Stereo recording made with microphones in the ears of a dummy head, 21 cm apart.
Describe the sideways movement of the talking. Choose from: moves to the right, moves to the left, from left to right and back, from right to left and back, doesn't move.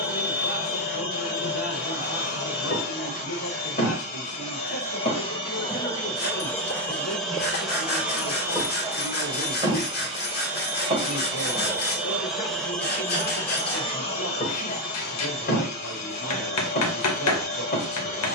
doesn't move.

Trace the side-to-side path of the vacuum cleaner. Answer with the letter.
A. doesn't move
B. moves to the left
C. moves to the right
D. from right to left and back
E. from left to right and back
E.